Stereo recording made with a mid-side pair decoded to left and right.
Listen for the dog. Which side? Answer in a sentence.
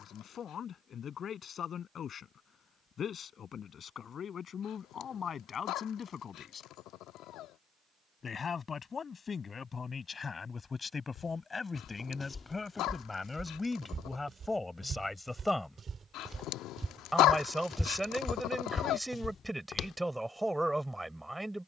You can hear the dog on the left.